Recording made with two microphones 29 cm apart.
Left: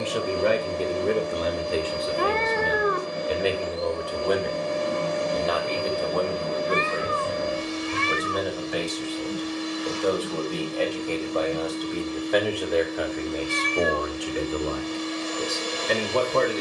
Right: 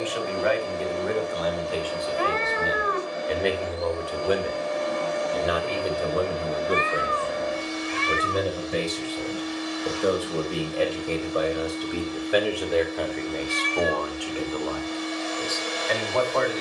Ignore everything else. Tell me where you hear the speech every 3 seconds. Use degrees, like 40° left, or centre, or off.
30° left, 10° right, 30° right, 20° right, 10° left, 40° left.